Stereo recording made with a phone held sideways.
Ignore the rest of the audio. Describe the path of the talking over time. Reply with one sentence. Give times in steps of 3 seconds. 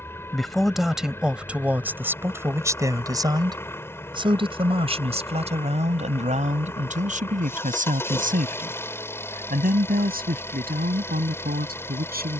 In this clip you hear the talking in the centre from 0 s and on the right from 3 s.